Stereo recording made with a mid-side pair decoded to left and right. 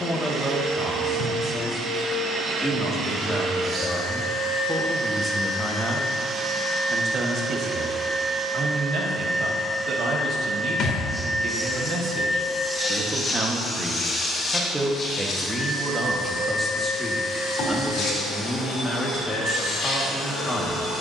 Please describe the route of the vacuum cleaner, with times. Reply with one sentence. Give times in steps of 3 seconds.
You can hear the vacuum cleaner on the right from 0 s, in the centre from 9 s and on the left from 12 s.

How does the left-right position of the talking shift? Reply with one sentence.
You can hear the talking move from left to right and back again.